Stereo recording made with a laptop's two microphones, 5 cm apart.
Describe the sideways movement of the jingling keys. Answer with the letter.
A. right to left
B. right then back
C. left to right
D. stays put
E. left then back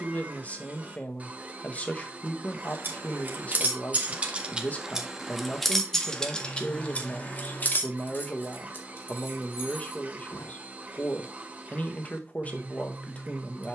A.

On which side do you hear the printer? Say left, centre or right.
right.